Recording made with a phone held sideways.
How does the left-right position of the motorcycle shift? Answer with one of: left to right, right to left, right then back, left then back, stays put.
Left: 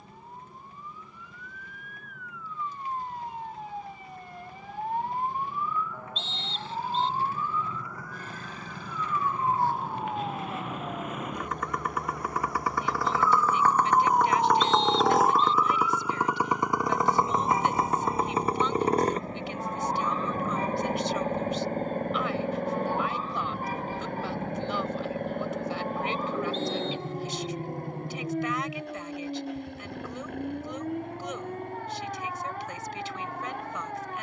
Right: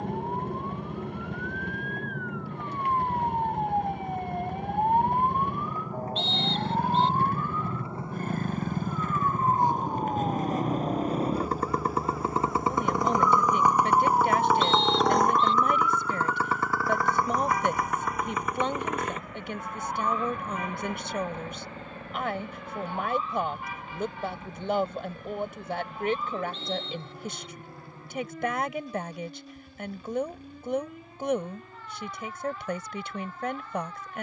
right to left.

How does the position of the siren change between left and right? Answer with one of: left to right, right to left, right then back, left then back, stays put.
right to left.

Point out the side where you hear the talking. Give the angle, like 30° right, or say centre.
50° right.